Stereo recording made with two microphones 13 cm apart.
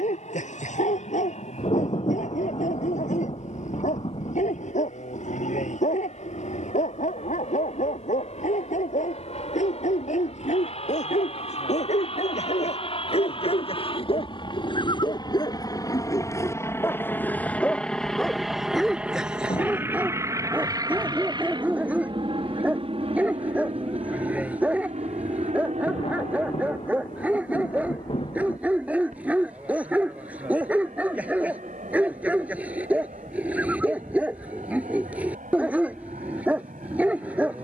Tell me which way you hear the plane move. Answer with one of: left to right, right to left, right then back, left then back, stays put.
left to right.